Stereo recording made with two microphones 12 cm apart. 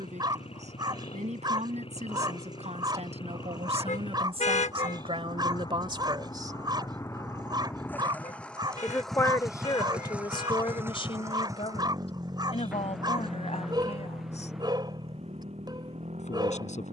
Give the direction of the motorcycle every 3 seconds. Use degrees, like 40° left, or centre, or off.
50° left, 40° left, 20° left, 10° right, 40° right, 60° right.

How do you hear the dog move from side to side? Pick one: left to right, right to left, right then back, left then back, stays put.
stays put.